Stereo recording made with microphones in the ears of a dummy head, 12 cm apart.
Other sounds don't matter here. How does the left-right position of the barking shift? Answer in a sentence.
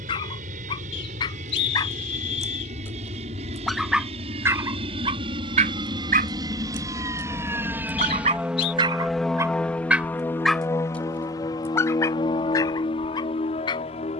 In this clip you hear the barking go right and come back.